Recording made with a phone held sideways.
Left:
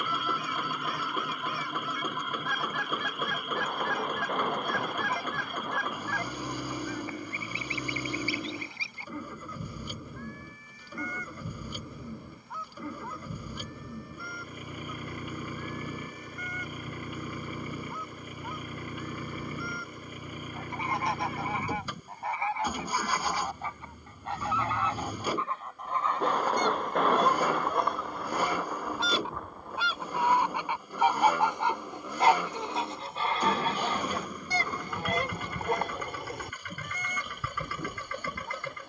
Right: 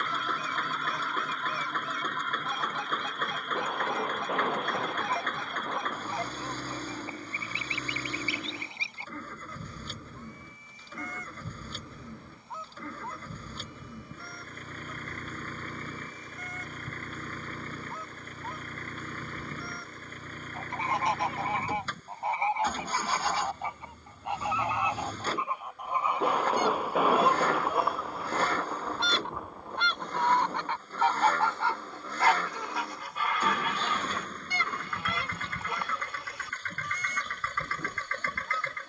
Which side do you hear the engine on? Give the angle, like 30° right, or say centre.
10° left.